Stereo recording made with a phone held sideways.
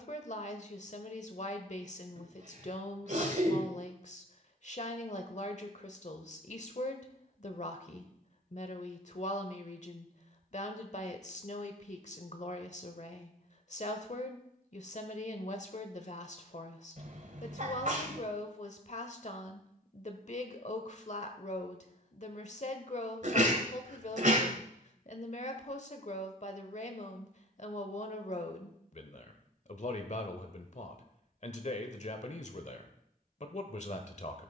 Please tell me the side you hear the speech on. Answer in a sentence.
You can hear the speech on the left.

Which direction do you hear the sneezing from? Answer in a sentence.
You can hear the sneezing on the right.